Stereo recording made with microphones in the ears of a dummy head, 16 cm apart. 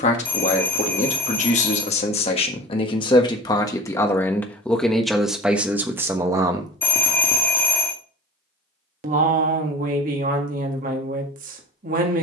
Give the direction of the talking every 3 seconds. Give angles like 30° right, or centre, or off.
40° left, 10° left, 20° right, 50° right.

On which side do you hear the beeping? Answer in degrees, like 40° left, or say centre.
10° left.